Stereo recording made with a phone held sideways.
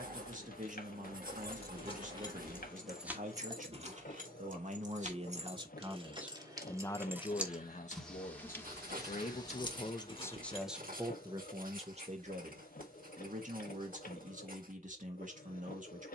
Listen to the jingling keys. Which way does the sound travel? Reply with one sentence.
You can hear the jingling keys move from left to right and back again.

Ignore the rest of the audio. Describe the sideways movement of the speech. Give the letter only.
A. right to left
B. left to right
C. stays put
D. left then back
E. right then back
D.